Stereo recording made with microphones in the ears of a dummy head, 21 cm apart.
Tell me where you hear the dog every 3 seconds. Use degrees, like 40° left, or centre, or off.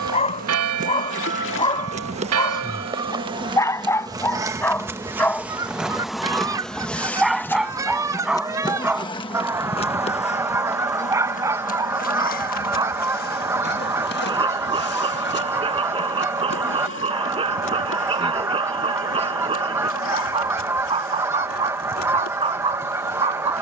20° left, 10° left, centre, 10° right, 20° right, 20° right, 20° right, 20° right.